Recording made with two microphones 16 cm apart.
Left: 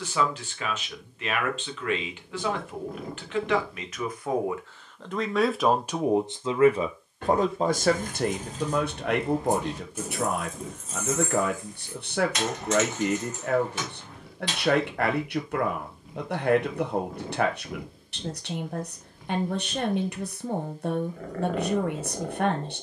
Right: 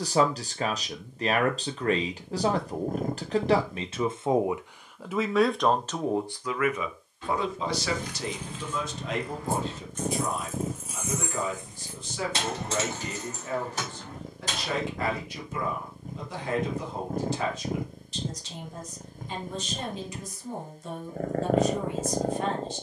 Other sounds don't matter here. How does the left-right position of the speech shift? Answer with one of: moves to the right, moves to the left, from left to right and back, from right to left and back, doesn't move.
moves to the left.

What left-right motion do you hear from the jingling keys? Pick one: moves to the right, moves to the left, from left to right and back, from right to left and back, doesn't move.
moves to the right.